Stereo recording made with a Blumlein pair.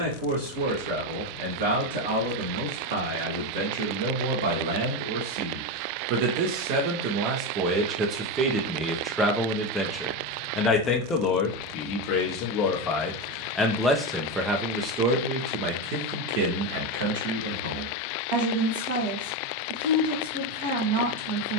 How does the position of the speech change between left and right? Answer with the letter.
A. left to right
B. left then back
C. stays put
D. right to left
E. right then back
B.